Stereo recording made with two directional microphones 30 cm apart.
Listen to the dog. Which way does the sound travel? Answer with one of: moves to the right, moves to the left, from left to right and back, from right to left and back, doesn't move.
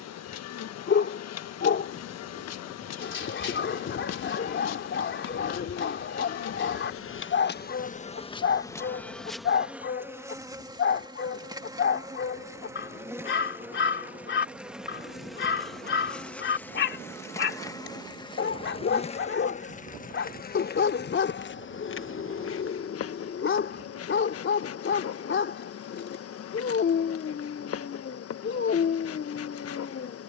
doesn't move.